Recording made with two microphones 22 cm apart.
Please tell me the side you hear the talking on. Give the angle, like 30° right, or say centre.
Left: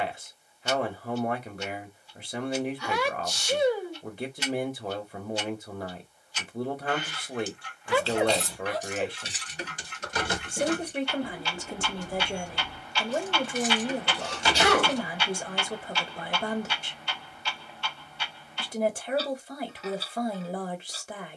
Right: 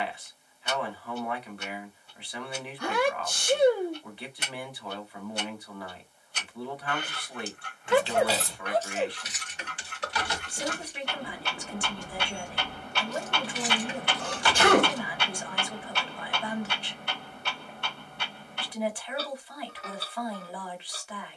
40° left.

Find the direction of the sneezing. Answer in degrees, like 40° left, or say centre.
50° right.